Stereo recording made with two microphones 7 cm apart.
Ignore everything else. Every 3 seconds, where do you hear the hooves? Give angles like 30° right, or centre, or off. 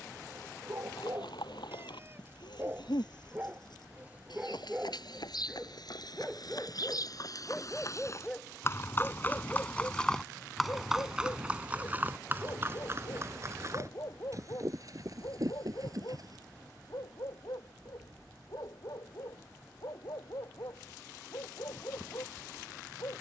80° left, 70° left, 50° left, 10° left, 40° right, 50° right, off, off.